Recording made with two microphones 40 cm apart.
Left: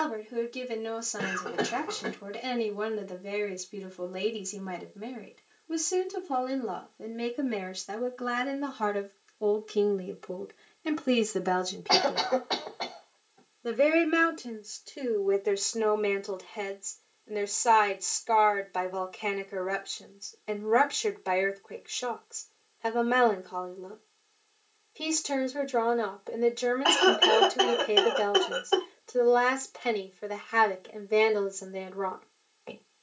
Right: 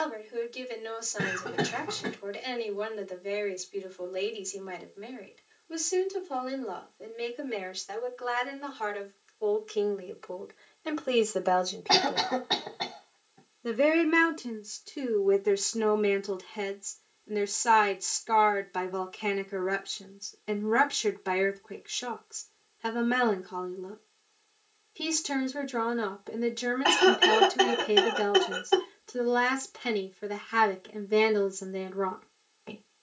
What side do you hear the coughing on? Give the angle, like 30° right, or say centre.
40° right.